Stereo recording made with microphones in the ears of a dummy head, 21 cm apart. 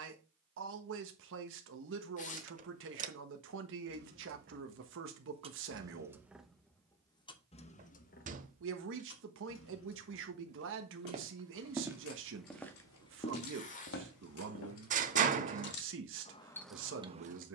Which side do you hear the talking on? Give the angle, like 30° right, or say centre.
60° right.